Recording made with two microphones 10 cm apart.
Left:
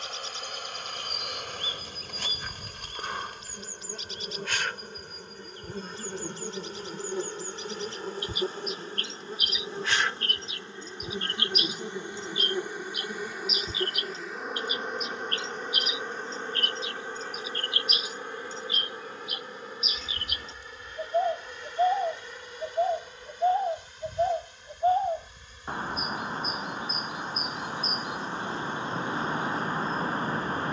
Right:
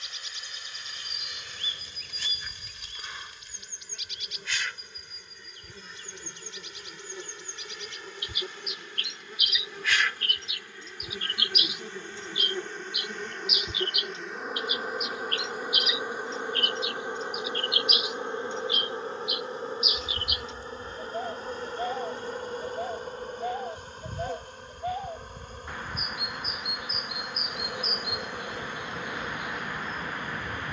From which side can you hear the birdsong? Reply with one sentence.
You can hear the birdsong on the left.